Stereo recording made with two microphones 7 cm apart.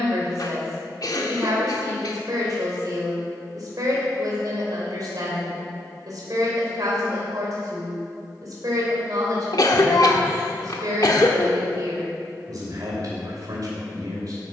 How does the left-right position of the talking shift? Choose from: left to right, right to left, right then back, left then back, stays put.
stays put.